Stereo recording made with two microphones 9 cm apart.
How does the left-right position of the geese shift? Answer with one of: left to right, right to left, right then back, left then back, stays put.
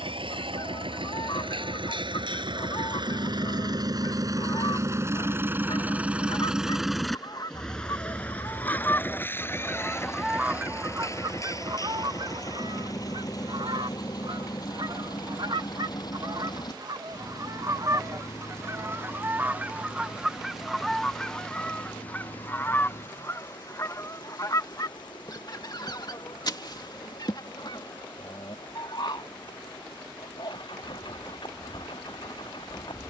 right then back.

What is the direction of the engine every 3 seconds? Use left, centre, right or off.
right, right, centre, left, left, left, left, left, left, left, left.